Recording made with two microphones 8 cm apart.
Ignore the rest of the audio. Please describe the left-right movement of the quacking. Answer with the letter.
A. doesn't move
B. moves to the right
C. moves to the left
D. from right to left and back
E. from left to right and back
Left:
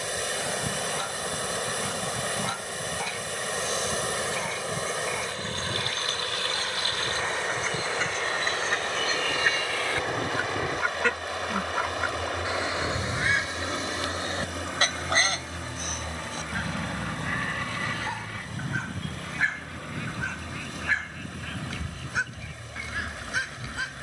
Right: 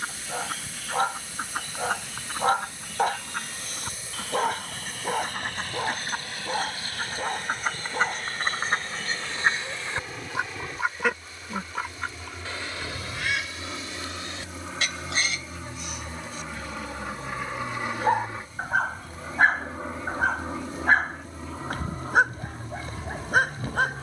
C.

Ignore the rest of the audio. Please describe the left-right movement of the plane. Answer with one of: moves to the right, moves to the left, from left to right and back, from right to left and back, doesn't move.
moves to the right.